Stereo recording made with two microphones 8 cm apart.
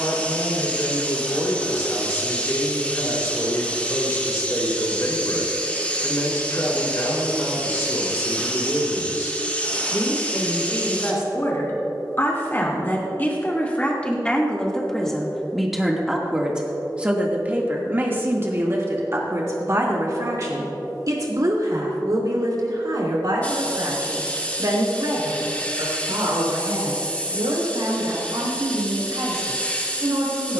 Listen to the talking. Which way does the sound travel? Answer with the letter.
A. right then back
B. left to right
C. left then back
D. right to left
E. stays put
B.